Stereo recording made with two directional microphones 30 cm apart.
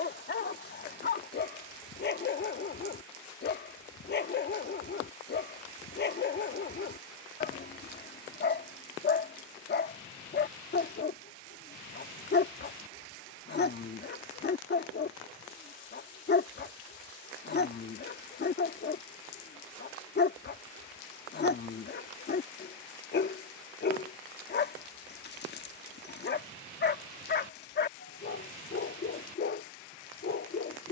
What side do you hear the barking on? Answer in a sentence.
In this clip you hear the barking on the left.